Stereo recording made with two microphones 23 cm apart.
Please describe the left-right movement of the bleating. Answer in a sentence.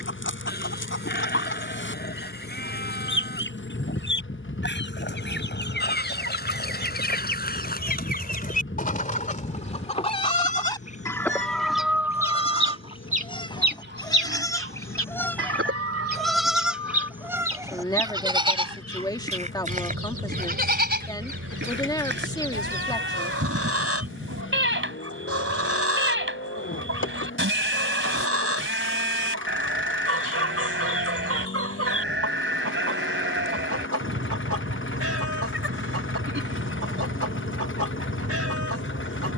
In this clip you hear the bleating move from left to right.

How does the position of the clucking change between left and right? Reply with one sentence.
In this clip you hear the clucking move from left to right.